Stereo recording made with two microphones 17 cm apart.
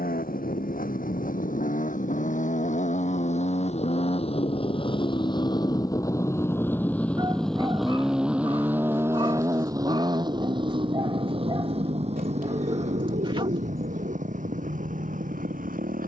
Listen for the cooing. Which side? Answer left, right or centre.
right.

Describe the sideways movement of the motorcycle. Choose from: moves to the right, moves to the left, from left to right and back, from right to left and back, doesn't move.
moves to the right.